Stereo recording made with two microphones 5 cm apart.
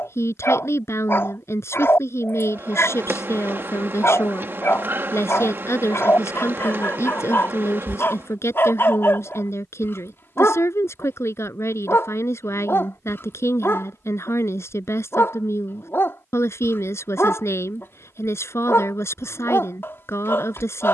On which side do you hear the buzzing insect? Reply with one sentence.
In this clip you hear the buzzing insect on the right.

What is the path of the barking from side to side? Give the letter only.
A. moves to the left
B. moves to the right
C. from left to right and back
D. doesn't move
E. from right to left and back
D.